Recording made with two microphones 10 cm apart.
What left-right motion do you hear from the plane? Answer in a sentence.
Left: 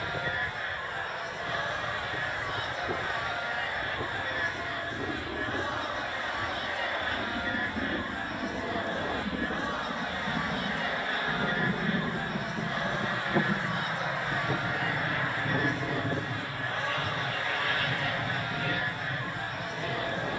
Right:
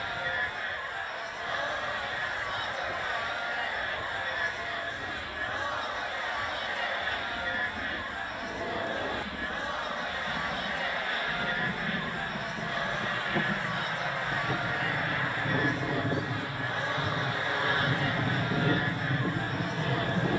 You can hear the plane travel towards the right.